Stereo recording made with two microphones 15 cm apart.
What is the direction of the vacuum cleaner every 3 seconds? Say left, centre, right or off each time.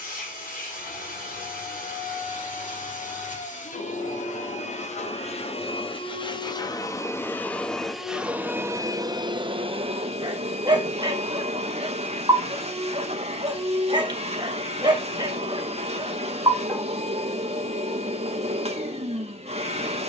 left, left, centre, right, right, right, right.